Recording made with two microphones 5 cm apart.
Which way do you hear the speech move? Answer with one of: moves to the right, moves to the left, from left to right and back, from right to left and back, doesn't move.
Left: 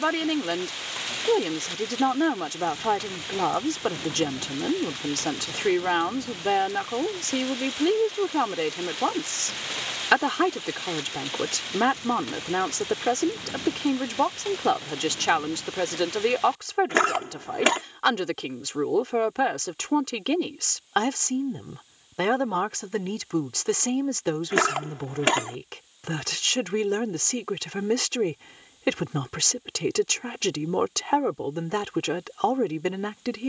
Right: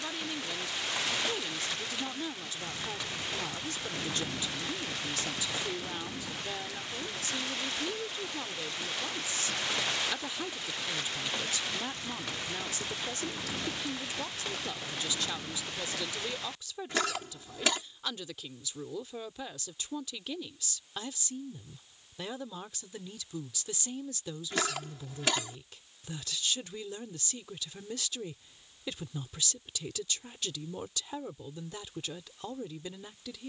doesn't move.